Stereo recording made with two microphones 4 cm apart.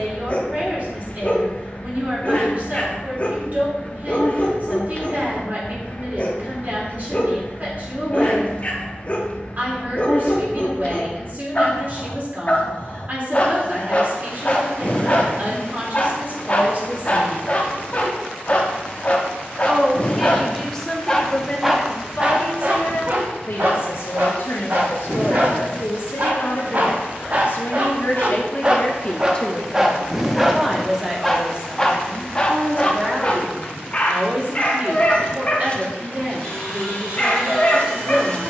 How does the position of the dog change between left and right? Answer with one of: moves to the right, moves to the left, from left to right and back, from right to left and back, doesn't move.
from left to right and back.